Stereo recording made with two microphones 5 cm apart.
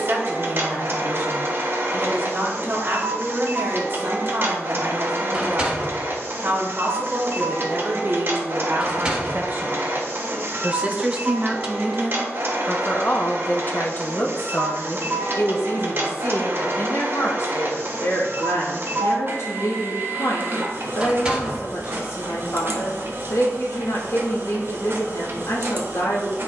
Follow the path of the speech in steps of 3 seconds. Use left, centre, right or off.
right, right, right, right, left, left, left, left, left.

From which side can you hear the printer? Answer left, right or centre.
right.